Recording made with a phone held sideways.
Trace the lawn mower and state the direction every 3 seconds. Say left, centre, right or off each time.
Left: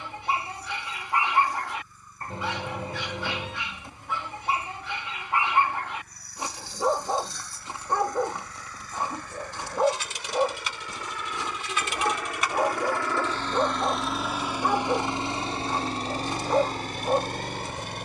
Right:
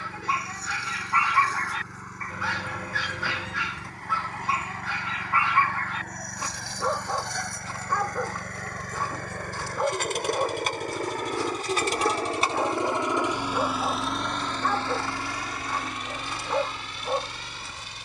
right, right, right, right, centre, left.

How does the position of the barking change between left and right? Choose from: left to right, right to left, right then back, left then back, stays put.
stays put.